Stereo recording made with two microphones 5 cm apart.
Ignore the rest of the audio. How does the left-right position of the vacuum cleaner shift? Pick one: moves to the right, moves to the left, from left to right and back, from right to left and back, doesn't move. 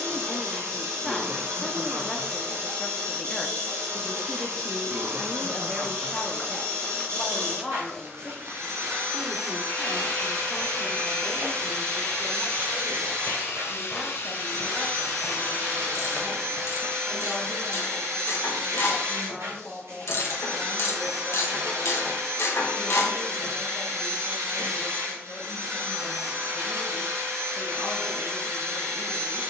doesn't move.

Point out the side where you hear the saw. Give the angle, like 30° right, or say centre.
60° left.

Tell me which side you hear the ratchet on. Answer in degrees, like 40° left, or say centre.
70° left.